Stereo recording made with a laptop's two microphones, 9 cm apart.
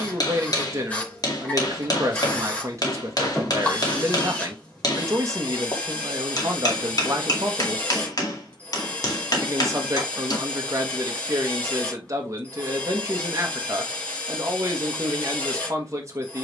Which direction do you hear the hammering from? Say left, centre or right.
left.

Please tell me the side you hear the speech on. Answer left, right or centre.
right.